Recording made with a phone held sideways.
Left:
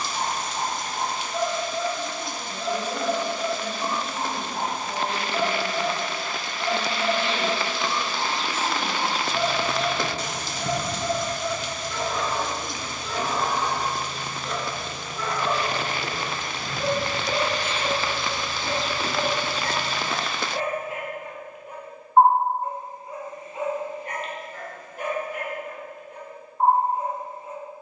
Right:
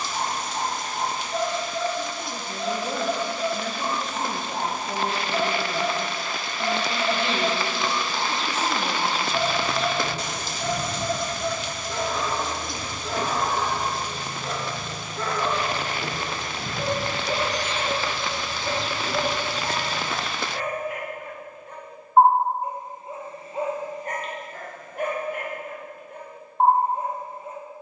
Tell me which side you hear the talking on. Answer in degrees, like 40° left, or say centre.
70° right.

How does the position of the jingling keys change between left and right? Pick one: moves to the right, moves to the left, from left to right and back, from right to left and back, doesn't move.
from left to right and back.